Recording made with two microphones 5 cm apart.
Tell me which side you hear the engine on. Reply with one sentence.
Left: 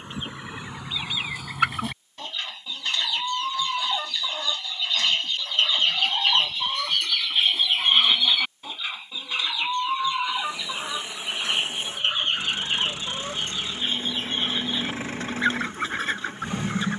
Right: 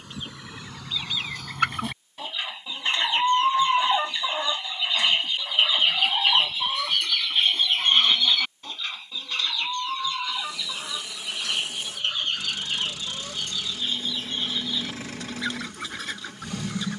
You can hear the engine on the left.